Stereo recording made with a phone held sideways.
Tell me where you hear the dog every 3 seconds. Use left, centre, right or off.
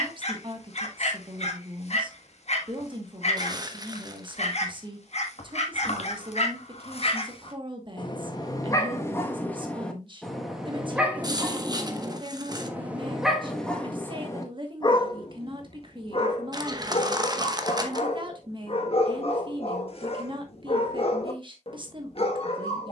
left, left, left, centre, centre, left, left, left.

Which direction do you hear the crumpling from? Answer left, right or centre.
right.